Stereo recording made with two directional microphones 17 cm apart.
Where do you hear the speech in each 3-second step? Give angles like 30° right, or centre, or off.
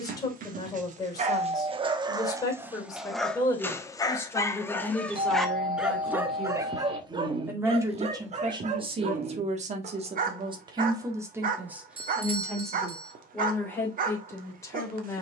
20° left, 10° left, 20° right, 30° right, 10° left.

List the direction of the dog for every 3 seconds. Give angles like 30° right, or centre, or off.
30° right, 10° left, 30° right, 50° right, 50° right.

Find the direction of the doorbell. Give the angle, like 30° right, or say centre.
30° right.